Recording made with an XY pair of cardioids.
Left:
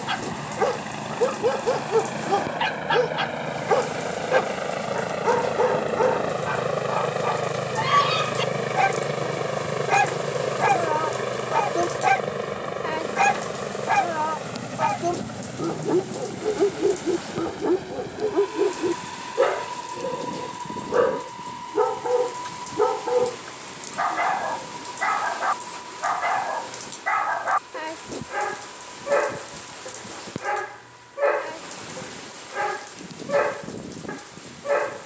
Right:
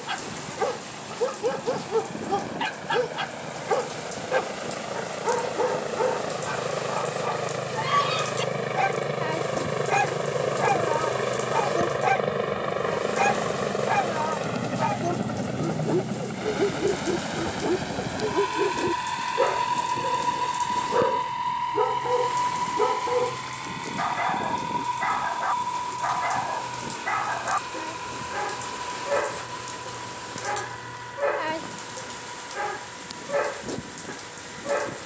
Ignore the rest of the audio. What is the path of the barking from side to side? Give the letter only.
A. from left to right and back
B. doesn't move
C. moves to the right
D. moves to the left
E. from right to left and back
B.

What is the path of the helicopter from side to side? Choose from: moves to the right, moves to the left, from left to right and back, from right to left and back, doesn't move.
moves to the right.